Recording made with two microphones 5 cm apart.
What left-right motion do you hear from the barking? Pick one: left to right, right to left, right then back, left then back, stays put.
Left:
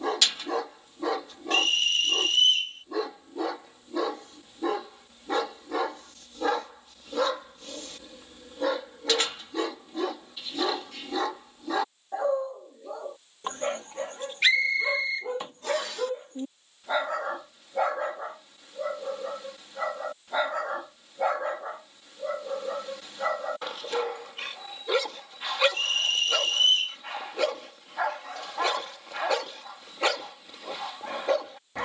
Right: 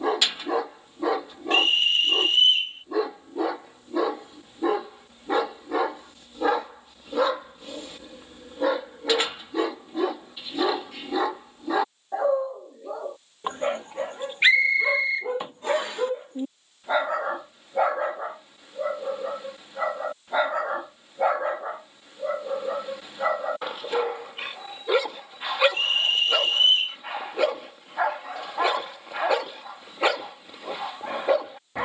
stays put.